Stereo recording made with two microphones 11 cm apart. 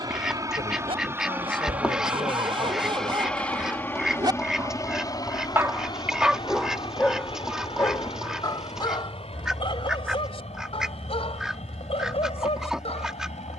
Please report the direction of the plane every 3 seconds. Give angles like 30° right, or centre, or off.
20° right, 30° left, 50° left, 60° left, 70° left.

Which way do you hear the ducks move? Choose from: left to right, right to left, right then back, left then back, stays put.
stays put.